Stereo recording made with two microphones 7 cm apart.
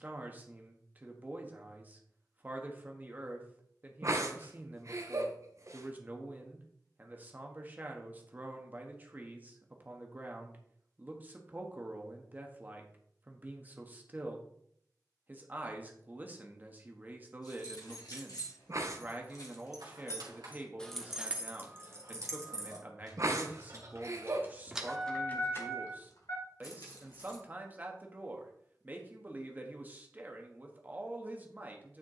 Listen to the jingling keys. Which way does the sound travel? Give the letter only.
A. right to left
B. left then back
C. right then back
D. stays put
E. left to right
C.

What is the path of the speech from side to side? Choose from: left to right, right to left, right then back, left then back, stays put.
stays put.